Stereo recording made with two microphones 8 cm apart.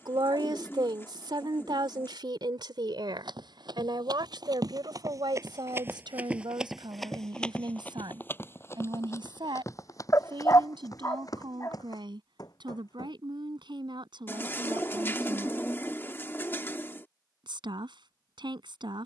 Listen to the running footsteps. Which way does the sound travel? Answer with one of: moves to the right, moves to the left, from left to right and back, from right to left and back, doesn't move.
moves to the left.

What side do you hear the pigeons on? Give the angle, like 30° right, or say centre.
30° left.